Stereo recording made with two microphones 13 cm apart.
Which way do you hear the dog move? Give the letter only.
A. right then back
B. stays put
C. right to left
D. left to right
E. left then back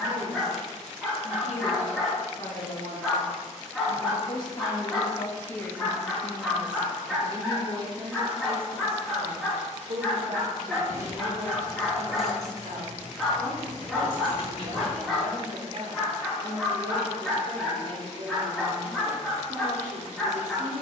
B.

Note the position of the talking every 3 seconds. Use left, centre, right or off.
left, left, right, right, right, right, right.